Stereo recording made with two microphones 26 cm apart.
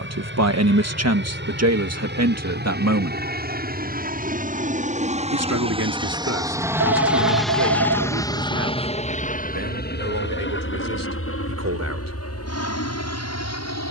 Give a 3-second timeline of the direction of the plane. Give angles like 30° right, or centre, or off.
50° right, 30° right, centre, 40° left, 60° left.